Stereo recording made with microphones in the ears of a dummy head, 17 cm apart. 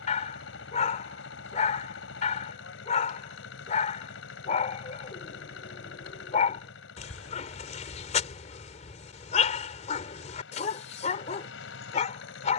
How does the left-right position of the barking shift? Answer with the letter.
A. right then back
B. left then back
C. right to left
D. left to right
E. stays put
E.